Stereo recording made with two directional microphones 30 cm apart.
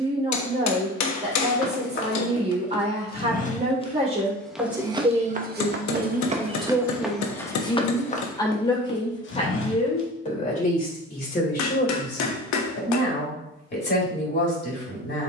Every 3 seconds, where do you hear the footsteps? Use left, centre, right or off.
left, centre, centre, left, off.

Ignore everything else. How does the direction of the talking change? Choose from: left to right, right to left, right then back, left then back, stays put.
right to left.